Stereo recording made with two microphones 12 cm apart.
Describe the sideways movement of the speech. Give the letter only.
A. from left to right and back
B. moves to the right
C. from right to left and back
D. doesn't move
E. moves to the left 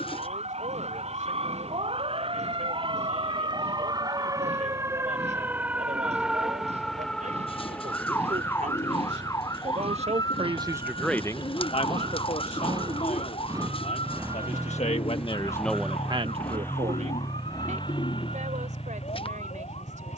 C.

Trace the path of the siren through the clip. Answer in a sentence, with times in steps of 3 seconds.
In this clip you hear the siren on the right from 0 s, in the centre from 6 s and on the left from 9 s.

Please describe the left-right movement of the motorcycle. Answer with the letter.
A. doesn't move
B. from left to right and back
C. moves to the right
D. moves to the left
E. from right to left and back
D.